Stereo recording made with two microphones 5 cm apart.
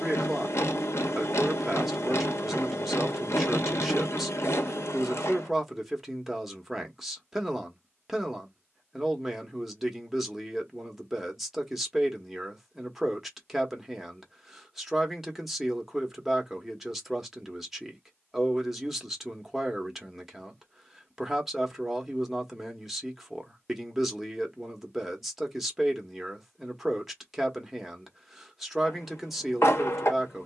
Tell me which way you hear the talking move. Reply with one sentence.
In this clip you hear the talking stay put.